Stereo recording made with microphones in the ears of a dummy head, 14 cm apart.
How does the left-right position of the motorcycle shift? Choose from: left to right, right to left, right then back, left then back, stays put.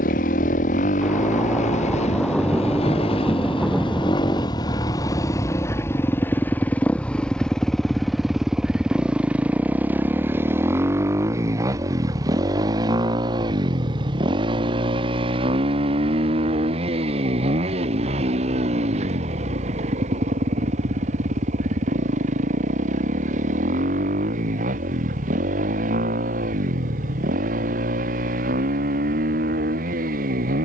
left to right.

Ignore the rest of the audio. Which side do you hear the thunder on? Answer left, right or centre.
centre.